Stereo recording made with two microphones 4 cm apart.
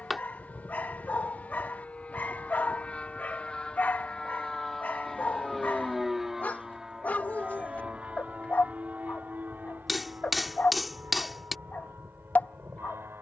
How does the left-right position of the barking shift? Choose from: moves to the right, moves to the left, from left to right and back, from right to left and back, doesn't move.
doesn't move.